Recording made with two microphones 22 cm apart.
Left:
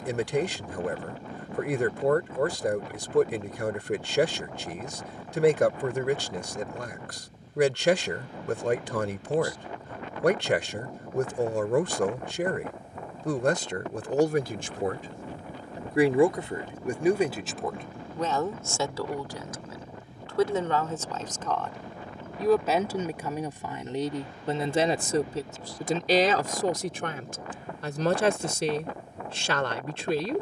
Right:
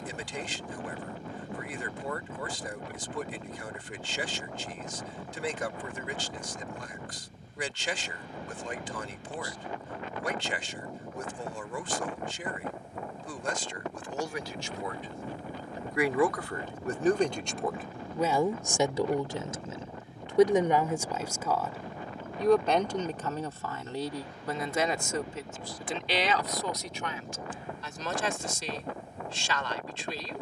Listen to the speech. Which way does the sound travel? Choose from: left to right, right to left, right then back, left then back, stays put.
right then back.